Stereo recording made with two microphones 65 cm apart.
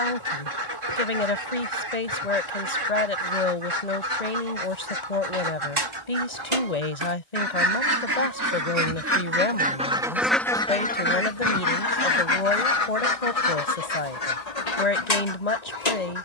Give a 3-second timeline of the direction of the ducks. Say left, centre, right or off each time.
right, right, right, centre, left, left.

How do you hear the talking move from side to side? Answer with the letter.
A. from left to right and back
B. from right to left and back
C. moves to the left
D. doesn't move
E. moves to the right
D.